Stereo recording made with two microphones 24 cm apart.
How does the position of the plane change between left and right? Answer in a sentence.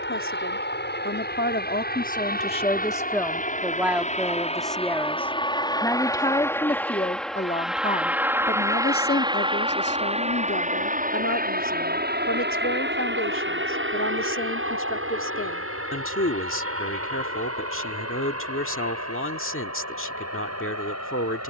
In this clip you hear the plane move from left to right.